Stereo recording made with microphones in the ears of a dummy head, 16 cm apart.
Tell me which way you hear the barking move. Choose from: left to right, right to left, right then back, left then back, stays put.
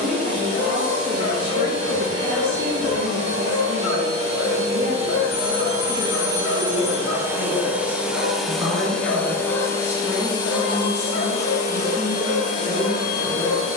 stays put.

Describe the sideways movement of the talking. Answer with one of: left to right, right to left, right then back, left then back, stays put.
right to left.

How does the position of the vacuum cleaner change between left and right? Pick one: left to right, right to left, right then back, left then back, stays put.
right to left.